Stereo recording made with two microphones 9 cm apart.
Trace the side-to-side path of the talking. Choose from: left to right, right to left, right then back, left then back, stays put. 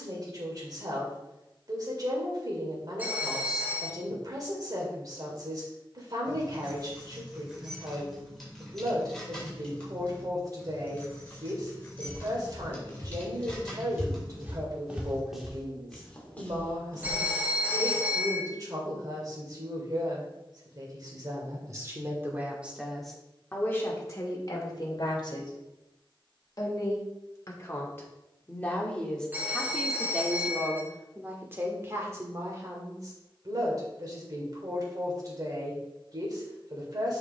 left then back.